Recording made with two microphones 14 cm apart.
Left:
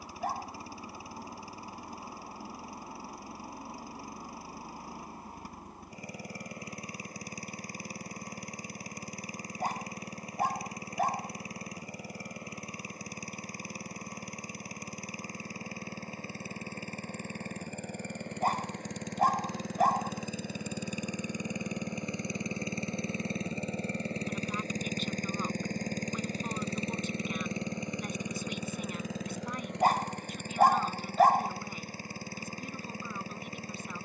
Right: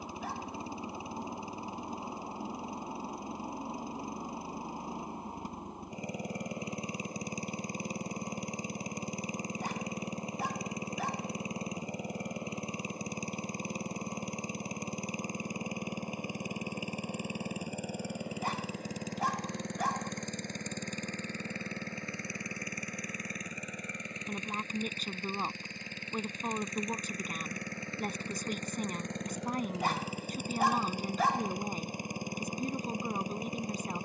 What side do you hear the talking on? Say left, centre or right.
right.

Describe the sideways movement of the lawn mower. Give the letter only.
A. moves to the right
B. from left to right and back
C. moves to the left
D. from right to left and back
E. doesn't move
D.